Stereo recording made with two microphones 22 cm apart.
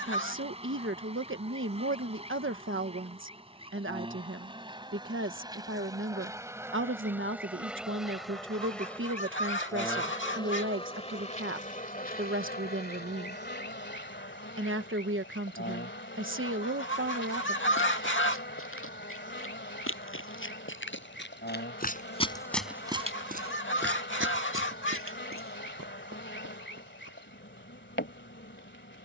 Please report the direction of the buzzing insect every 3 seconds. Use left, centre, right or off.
right, right, centre, left, left, left, left, left, left, left.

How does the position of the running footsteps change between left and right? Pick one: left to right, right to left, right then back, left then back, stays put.
left to right.